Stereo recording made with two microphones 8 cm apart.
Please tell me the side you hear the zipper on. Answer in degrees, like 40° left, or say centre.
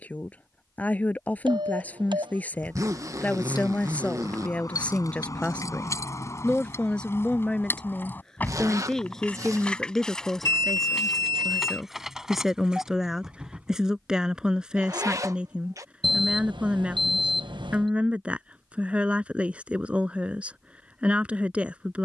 40° right.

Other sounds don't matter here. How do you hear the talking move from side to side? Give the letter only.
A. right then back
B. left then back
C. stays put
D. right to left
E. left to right
E.